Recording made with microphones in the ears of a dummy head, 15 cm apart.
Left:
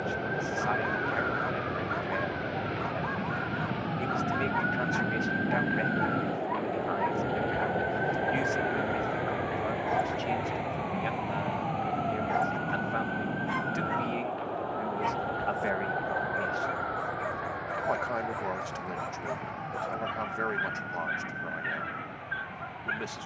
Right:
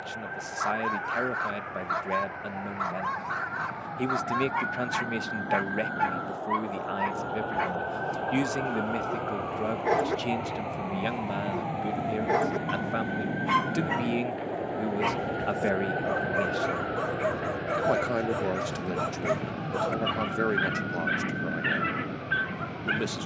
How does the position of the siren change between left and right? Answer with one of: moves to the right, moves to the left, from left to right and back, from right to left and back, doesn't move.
moves to the right.